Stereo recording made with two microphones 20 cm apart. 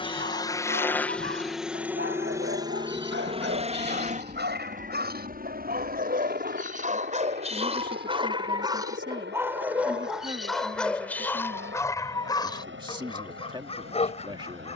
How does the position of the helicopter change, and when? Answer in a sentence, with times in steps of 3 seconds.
In this clip you hear the helicopter in the centre from 0 s and on the right from 3 s.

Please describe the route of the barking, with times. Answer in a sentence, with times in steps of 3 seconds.
You can hear the barking on the right from 0 s, in the centre from 9 s and on the left from 12 s.